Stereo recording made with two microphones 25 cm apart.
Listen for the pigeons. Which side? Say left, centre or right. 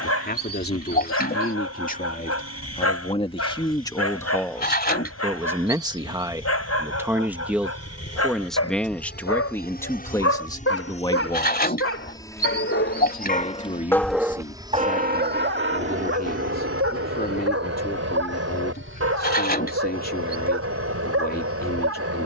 left.